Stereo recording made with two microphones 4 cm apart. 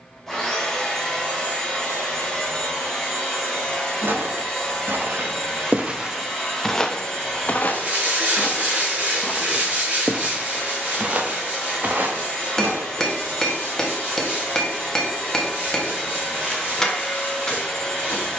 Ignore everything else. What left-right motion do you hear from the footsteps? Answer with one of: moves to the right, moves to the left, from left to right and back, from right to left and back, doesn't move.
from right to left and back.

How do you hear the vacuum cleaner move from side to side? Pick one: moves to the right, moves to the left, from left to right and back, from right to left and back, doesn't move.
doesn't move.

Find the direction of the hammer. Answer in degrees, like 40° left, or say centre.
10° left.